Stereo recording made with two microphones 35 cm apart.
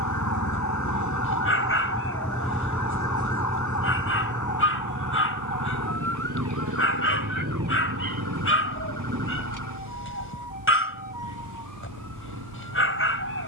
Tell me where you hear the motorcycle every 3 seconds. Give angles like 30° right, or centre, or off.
10° left, 30° right, 60° right, 70° right, 70° right.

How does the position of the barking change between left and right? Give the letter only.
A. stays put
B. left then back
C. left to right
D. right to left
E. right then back
A.